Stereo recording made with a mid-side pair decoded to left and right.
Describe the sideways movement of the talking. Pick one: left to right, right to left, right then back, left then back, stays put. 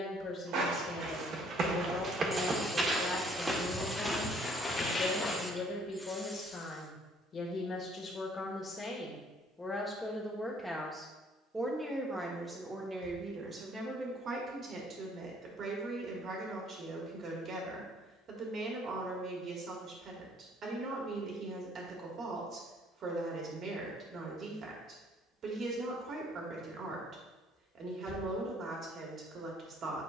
left to right.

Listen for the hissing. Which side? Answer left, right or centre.
centre.